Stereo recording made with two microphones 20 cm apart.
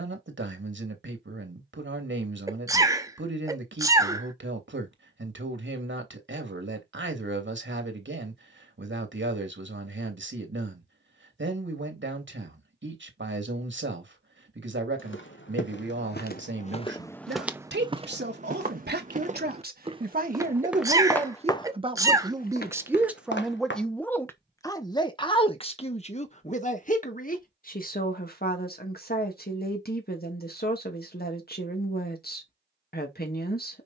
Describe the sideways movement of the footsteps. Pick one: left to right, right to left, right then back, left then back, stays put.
right then back.